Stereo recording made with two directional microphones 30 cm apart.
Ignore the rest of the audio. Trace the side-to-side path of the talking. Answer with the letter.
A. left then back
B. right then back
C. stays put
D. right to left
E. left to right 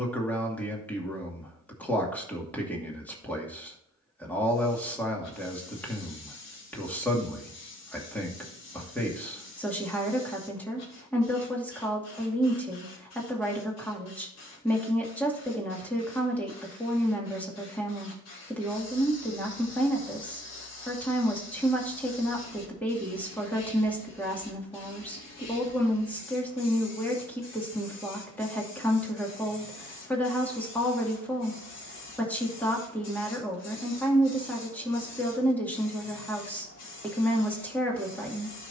C.